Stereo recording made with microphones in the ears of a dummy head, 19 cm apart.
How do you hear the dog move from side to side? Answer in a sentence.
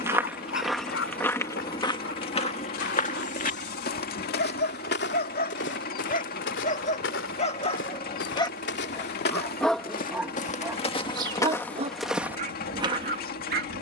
In this clip you hear the dog travel towards the right.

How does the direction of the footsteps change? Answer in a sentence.
In this clip you hear the footsteps move from right to left and back again.